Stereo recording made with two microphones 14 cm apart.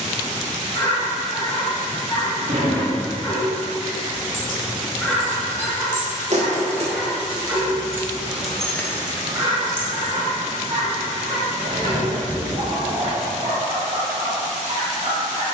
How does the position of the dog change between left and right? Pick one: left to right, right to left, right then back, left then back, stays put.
left to right.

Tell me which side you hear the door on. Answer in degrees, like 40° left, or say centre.
70° right.